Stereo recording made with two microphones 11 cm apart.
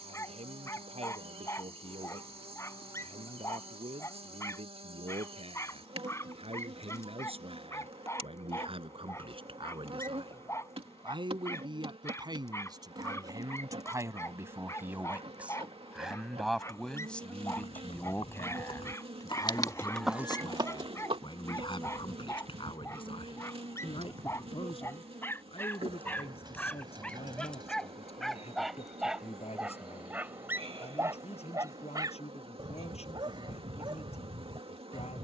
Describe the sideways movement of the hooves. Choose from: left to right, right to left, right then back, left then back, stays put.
left to right.